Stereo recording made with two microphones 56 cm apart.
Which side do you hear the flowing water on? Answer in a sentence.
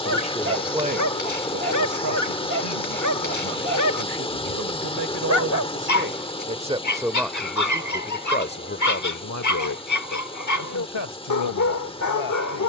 In this clip you hear the flowing water in the centre.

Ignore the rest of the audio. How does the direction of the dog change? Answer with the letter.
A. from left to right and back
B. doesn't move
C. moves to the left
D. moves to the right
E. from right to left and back
B.